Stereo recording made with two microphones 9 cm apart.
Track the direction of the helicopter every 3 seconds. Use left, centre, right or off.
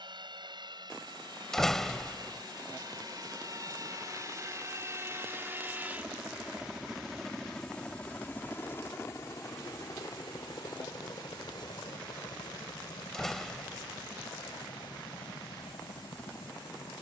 right, right, centre, left, left, left.